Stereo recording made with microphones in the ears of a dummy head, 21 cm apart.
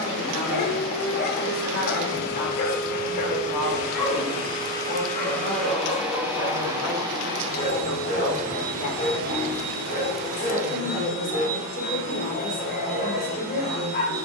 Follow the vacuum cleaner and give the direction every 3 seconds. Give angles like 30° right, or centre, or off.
50° left, 20° left, 20° right, 50° right, 60° right.